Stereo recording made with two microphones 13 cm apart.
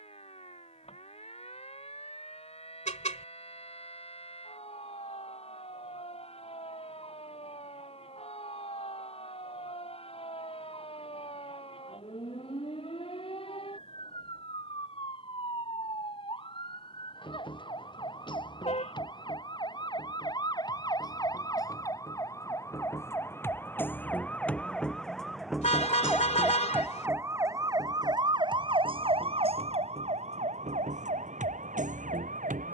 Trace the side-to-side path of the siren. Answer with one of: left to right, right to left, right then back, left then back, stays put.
left to right.